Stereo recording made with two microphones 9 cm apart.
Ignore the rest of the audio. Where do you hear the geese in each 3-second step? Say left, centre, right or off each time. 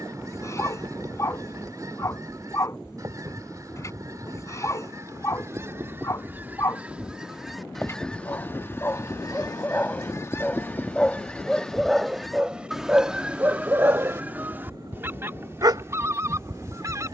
right, right, centre, left, centre, right.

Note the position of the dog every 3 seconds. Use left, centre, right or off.
left, left, left, centre, right, right.